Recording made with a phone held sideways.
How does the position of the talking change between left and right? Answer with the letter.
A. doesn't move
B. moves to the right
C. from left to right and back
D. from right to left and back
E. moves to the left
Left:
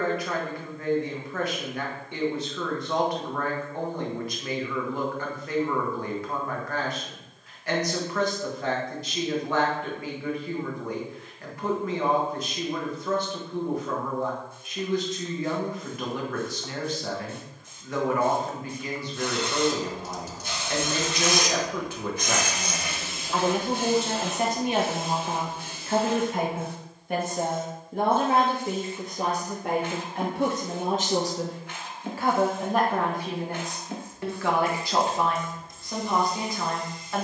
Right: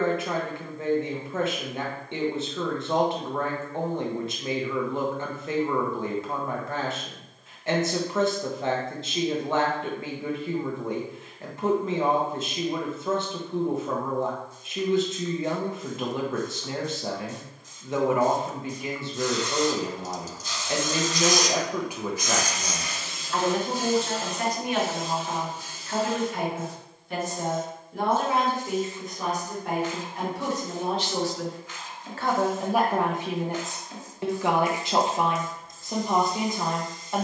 D.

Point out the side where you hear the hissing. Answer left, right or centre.
left.